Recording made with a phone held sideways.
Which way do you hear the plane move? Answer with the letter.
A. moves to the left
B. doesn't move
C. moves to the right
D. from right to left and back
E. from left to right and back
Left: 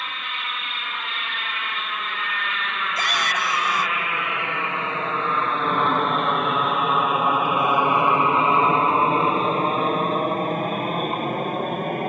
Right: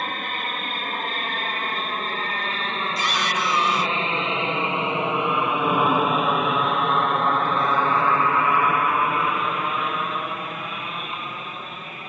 A.